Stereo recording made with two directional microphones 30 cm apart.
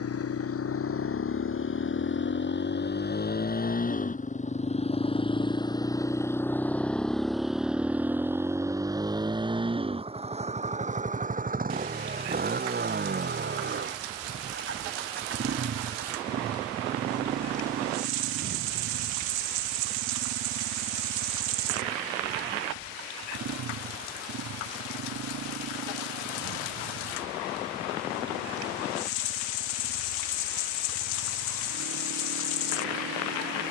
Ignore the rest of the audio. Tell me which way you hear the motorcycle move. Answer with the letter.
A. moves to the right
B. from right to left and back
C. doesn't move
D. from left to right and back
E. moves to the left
A.